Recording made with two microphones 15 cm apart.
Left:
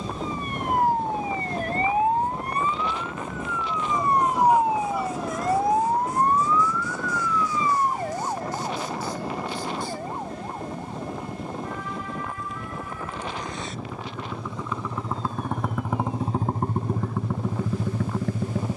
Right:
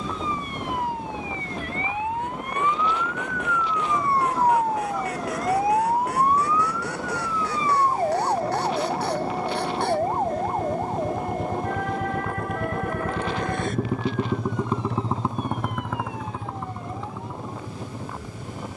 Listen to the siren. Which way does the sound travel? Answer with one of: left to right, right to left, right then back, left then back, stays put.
left to right.